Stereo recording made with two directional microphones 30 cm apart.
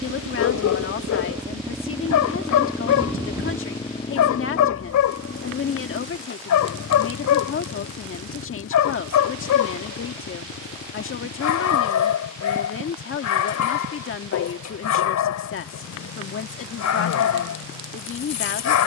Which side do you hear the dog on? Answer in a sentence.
You can hear the dog on the left.